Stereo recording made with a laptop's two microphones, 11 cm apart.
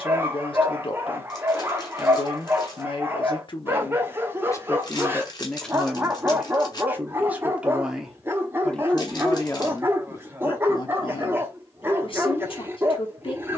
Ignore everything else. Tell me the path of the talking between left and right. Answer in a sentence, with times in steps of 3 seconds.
You can hear the talking on the left from 0 s, in the centre from 6 s and on the left from 9 s.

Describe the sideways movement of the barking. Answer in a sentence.
You can hear the barking stay in one place.